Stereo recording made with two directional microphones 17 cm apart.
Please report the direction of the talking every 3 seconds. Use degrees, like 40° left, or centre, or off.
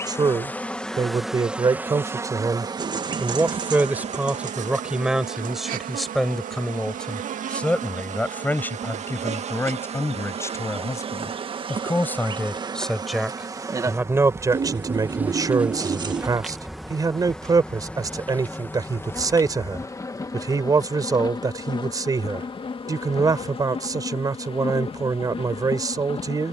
20° right, 10° right, 10° left, 10° left, 10° right, 20° right, 20° right, 20° right, 20° right.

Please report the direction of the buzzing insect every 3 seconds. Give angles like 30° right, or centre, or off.
10° right, 40° right, 50° right, 40° right, 20° right, centre, 20° left, 30° left, 30° left.